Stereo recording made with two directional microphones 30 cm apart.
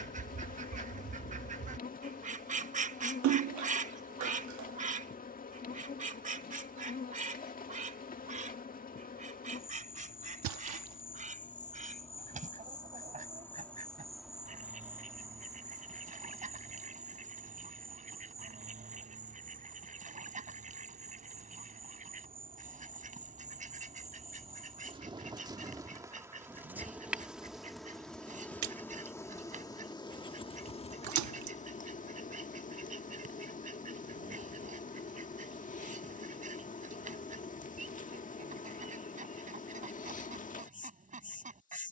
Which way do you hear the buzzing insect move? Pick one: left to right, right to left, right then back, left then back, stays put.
right then back.